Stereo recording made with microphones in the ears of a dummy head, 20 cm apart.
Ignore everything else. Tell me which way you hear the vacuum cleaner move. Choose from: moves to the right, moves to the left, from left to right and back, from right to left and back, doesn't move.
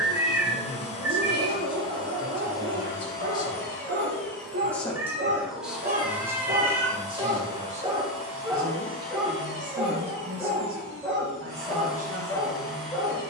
moves to the right.